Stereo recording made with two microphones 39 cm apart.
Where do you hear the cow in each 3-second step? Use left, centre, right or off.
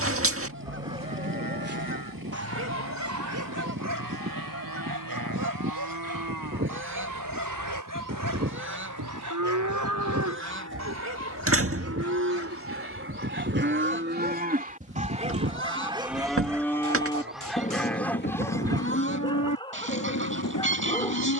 right, right, right, right, right, centre, left.